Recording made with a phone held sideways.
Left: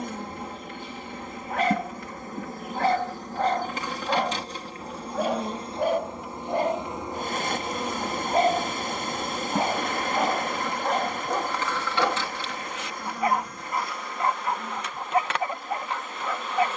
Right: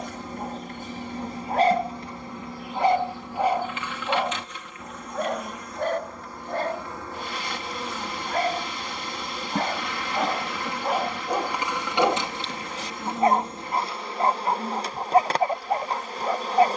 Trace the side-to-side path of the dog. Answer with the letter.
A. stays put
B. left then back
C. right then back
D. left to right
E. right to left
B.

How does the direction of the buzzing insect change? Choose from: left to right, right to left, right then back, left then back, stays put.
left to right.